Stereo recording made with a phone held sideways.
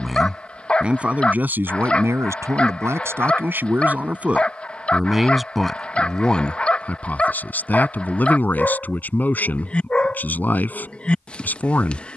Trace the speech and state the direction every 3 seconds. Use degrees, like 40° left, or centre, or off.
10° right, 10° right, 10° left, 10° left.